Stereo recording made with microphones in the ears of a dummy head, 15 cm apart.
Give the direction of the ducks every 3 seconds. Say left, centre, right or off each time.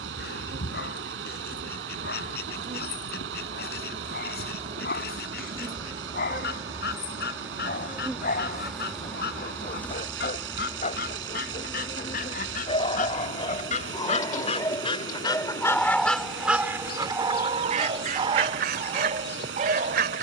left, left, left, left, left, centre, right.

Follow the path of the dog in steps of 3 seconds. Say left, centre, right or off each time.
left, left, left, left, left, centre, right.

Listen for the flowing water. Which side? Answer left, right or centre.
right.